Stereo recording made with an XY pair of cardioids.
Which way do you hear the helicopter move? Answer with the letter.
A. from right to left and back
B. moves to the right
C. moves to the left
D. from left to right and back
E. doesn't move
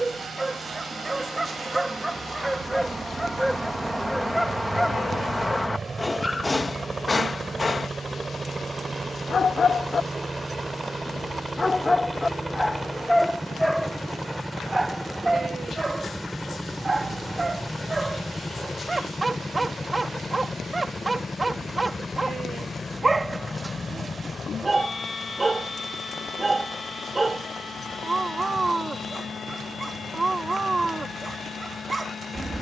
C.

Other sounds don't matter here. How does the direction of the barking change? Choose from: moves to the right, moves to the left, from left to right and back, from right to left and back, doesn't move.
from right to left and back.